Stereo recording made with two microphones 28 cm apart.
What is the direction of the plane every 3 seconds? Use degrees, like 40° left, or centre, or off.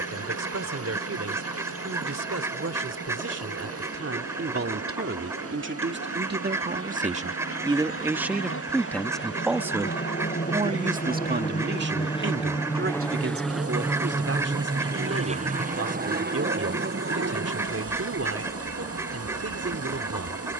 70° left, 70° left, 60° left, 40° left, centre, 40° right, 50° right.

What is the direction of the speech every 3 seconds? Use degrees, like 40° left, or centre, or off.
60° right, 50° right, 20° right, 20° right, 50° right, 60° right, 60° right.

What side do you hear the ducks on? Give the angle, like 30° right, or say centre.
10° right.